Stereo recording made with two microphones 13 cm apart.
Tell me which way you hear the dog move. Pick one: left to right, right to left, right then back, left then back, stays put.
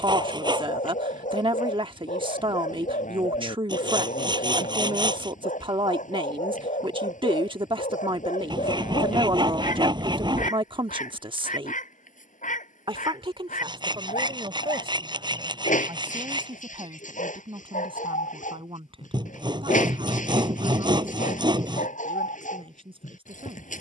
stays put.